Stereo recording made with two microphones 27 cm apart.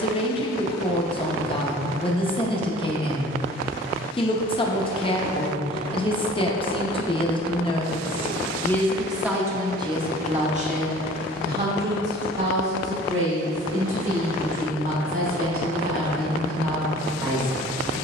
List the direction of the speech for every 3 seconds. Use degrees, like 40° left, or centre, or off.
20° left, 20° left, 20° left, 20° right, 50° right, 50° right.